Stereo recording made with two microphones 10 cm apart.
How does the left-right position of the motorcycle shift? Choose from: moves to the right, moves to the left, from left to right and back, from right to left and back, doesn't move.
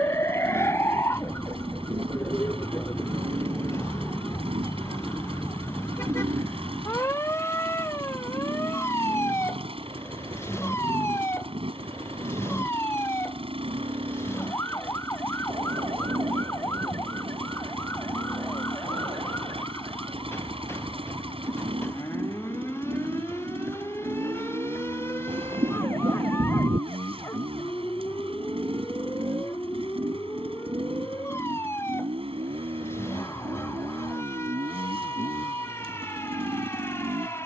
doesn't move.